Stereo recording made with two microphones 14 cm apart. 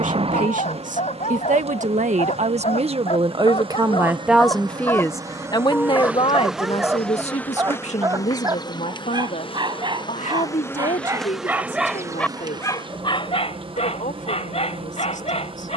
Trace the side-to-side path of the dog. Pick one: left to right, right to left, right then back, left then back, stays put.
right then back.